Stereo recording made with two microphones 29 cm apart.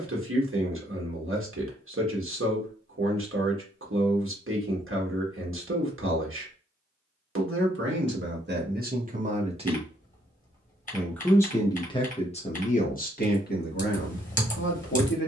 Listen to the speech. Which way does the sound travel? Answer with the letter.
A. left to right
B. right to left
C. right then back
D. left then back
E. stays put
B.